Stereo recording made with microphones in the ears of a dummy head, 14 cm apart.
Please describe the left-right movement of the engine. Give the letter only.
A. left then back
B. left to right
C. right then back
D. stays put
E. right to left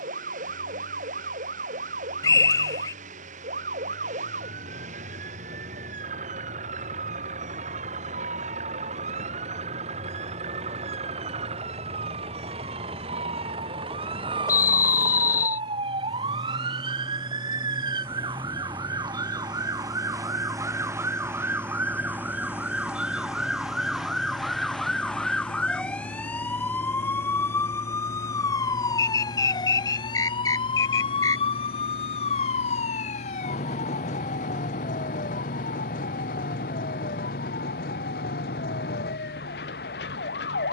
E.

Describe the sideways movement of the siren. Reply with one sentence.
In this clip you hear the siren go from the right side to the left.